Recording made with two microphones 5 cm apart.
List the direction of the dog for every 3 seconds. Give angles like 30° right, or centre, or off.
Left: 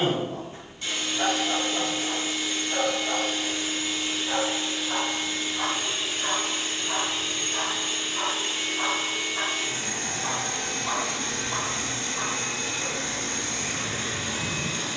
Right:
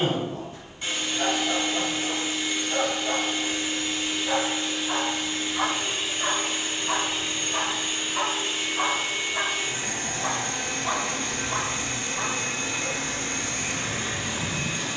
20° left, 20° right, 30° right, 10° right, 20° left.